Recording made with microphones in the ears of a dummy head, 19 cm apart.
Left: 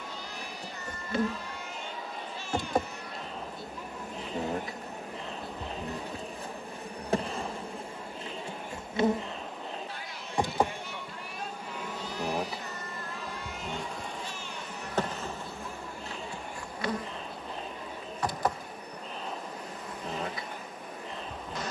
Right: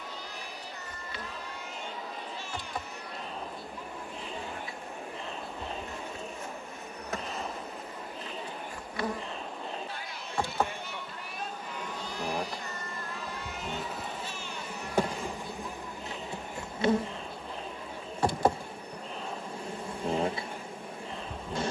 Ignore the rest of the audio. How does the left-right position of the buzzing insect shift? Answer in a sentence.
You can hear the buzzing insect move from left to right.